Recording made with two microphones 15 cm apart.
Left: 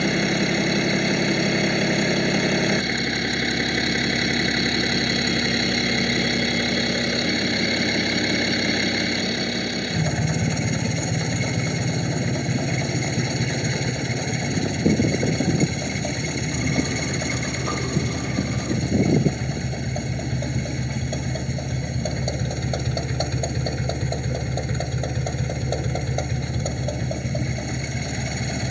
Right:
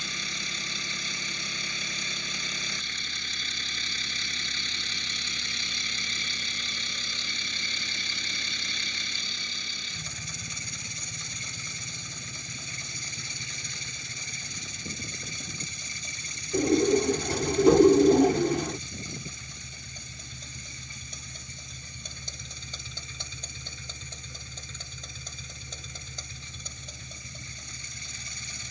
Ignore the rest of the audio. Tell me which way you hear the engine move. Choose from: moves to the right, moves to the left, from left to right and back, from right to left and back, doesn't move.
doesn't move.